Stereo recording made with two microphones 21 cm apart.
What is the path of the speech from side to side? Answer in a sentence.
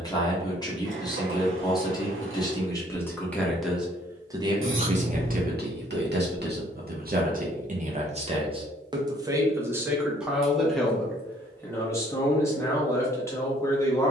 You can hear the speech move from left to right and back again.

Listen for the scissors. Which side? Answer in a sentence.
In this clip you hear the scissors on the right.